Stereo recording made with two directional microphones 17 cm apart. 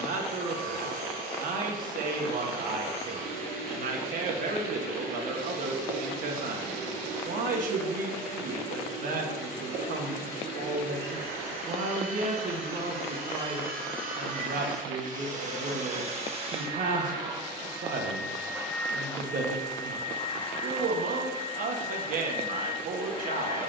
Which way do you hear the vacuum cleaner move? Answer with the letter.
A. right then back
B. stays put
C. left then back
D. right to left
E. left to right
D.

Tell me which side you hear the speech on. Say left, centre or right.
right.